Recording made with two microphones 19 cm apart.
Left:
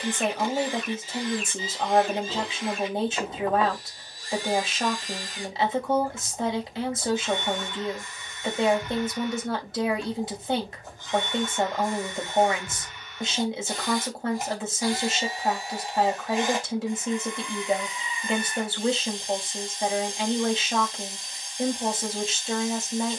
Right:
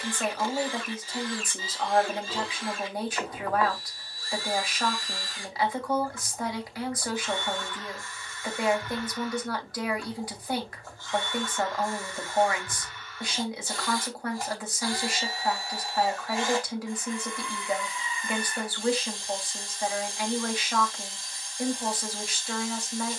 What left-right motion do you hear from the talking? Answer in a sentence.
You can hear the talking stay in one place.